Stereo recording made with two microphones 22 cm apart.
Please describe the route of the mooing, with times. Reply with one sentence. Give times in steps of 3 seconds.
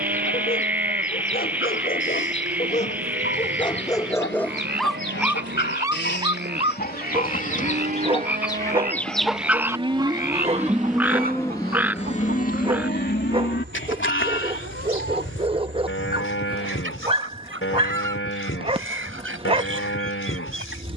You can hear the mooing on the right from 0 s, in the centre from 9 s and on the left from 12 s.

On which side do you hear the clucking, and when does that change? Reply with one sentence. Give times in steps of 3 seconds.
In this clip you hear the clucking on the left from 0 s and on the right from 9 s.